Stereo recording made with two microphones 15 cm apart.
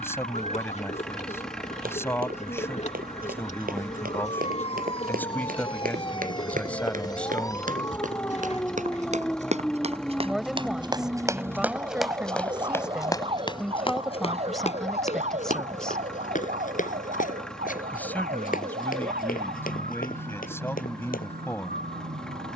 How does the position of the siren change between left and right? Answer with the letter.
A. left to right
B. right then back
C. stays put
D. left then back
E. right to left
A.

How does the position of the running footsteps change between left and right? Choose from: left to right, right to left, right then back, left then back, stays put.
right to left.